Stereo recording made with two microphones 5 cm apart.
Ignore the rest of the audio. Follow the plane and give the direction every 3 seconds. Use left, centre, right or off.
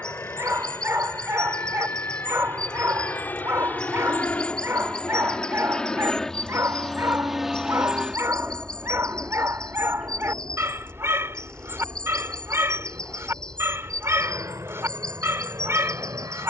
left, left, centre, right, right, right.